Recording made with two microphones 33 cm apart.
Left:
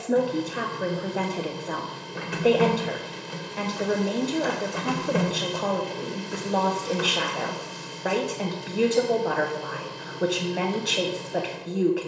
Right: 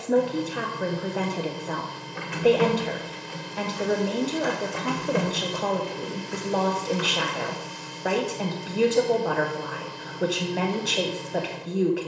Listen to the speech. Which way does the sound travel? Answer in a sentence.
In this clip you hear the speech stay in one place.